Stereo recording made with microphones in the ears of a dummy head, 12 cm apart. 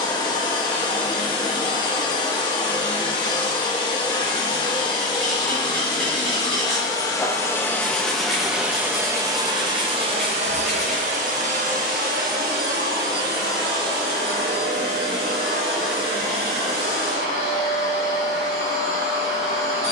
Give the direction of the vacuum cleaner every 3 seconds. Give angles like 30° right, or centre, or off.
30° left, 30° left, 10° left, 50° right, 70° right, 80° right, 80° right.